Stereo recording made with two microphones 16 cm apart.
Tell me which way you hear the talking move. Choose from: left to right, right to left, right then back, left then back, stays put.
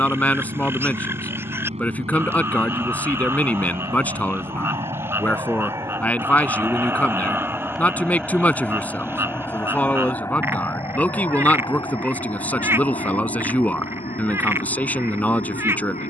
stays put.